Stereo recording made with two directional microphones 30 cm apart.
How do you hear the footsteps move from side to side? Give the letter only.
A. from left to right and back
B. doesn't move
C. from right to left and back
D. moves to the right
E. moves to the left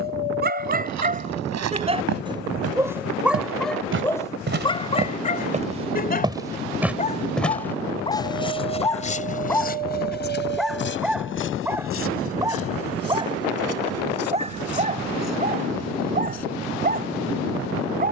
E.